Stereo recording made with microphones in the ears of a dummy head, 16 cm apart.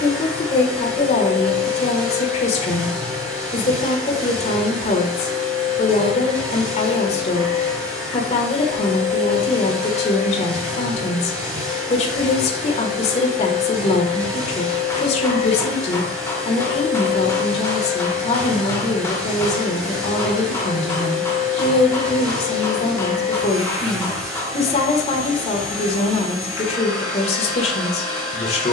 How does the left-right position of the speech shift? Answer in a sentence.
In this clip you hear the speech stay in one place.